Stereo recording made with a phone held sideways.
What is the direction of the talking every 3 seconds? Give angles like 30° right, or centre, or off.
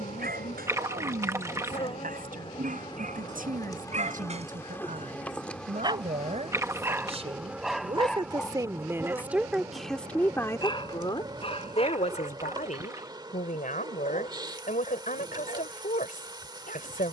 60° right, 60° right, 30° right, 10° left, 60° left, 60° left.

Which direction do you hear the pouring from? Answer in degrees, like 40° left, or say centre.
20° right.